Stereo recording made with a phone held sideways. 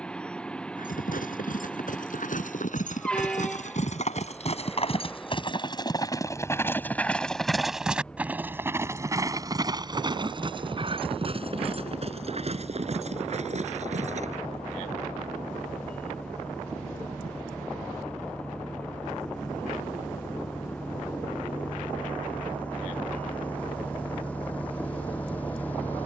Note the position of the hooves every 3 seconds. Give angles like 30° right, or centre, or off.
70° left, 50° left, centre, 30° right, 50° right, off, off, off, off.